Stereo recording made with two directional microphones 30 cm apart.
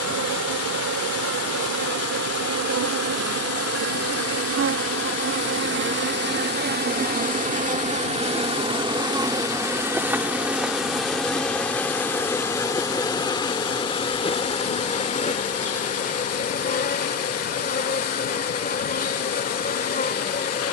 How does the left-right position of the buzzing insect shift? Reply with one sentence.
In this clip you hear the buzzing insect move from right to left.